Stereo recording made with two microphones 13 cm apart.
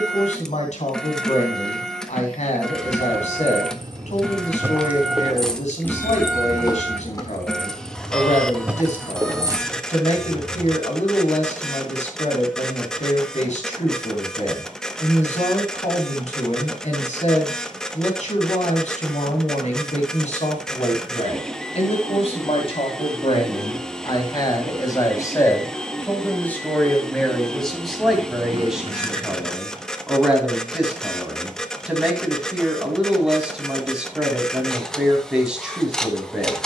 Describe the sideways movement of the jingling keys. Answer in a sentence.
In this clip you hear the jingling keys move from right to left and back again.